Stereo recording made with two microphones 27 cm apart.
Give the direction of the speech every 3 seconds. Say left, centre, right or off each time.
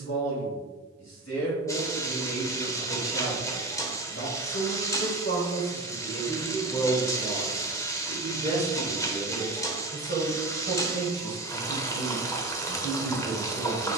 left, left, centre, right, right.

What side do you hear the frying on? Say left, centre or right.
centre.